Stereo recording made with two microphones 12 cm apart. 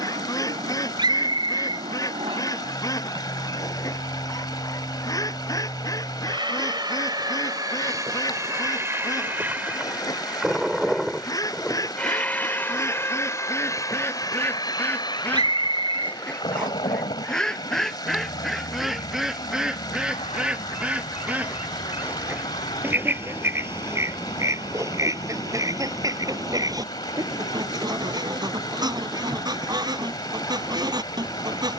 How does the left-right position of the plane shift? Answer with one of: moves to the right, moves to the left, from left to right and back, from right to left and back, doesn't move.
moves to the left.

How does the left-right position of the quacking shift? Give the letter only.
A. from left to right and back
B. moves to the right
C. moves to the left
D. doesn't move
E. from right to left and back
B.